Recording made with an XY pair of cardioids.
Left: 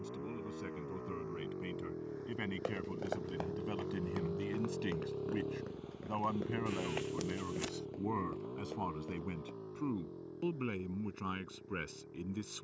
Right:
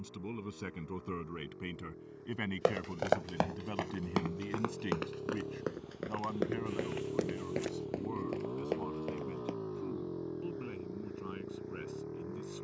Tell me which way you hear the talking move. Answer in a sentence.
In this clip you hear the talking move from right to left.